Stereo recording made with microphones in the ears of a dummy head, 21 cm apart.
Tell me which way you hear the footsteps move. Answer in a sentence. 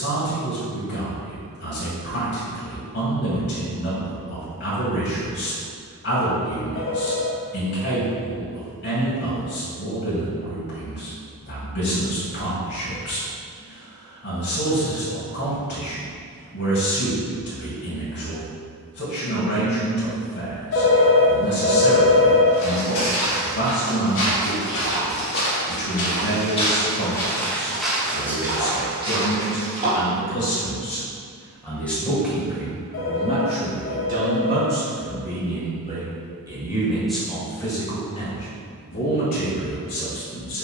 In this clip you hear the footsteps move to the right.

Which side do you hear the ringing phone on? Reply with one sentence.
You can hear the ringing phone on the left.